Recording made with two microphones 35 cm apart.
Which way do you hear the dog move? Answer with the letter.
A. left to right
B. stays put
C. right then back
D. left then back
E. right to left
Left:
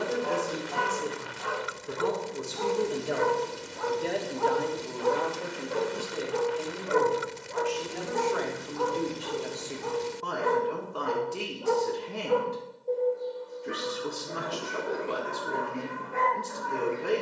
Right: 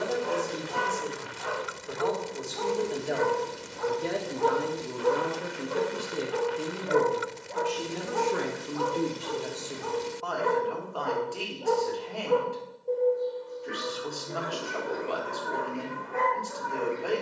D.